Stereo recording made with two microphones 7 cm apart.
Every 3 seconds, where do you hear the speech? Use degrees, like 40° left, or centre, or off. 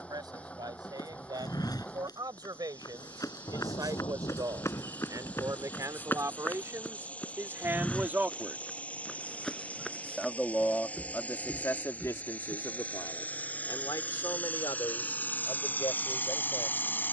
60° right, 50° right, 30° right, 30° left, 50° left, 70° left.